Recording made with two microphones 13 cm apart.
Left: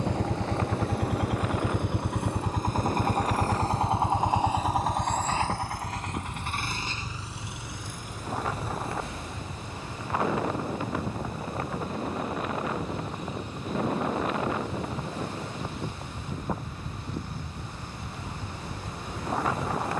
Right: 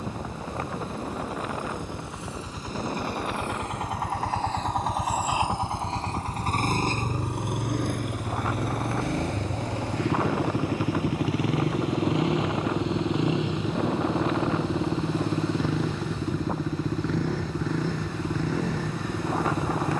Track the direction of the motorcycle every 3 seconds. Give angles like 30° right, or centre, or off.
60° left, 10° left, 50° right, 70° right, 70° right, 80° right, 80° right.